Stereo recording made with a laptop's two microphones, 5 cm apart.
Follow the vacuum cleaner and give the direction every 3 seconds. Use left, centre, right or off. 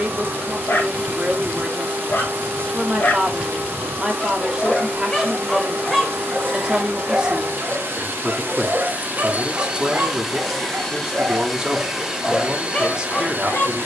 right, right, right, centre, right.